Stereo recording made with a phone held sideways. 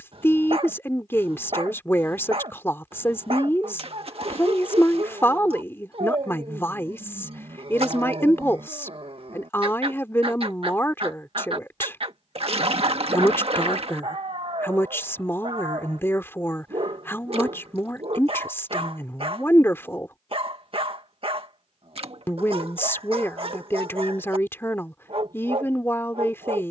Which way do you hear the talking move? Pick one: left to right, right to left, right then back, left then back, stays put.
stays put.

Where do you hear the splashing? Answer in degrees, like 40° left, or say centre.
50° right.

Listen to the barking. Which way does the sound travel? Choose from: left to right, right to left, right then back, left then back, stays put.
stays put.